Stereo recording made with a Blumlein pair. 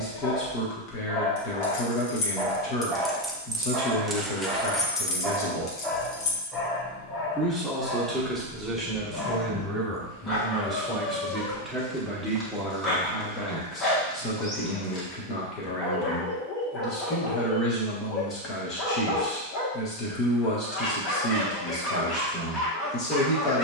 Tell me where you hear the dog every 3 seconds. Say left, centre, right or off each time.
centre, centre, left, left, left, left, left, left.